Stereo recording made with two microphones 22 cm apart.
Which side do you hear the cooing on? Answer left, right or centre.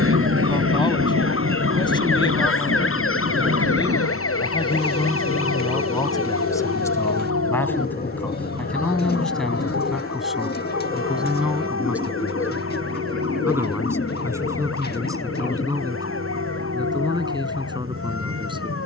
left.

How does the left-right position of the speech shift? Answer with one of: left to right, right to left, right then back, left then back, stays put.
left to right.